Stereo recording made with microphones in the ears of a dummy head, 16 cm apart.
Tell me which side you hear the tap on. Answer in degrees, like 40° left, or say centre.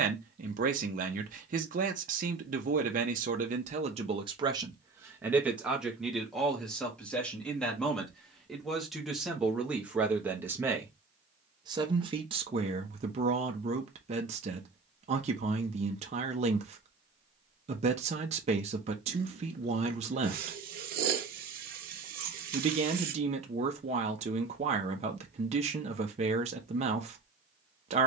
50° right.